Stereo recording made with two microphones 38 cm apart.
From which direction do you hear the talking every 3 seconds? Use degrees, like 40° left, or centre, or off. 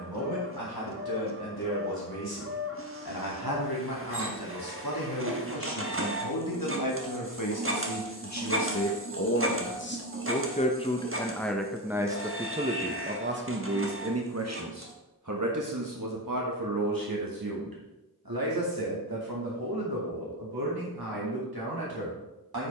70° left, 70° left, 50° left, 20° left, 30° right, 60° right, 70° right, 70° right.